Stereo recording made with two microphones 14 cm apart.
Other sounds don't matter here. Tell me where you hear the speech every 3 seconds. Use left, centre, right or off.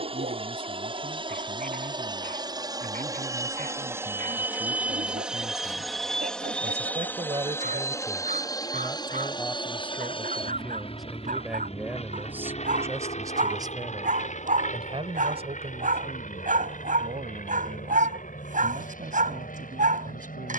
right, right, right, centre, right, right, right.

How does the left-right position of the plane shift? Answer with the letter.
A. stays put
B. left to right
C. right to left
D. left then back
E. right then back
C.